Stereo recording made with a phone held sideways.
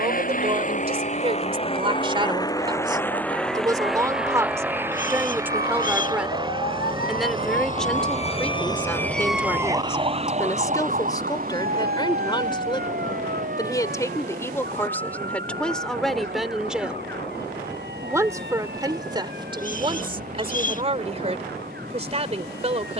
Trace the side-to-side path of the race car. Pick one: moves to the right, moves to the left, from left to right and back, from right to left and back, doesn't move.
moves to the right.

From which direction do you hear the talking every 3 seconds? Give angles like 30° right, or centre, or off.
30° right, 20° right, centre, 20° left, 20° left, centre, 30° right, 40° right.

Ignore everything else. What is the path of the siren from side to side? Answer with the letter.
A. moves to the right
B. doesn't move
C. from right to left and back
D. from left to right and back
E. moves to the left
A.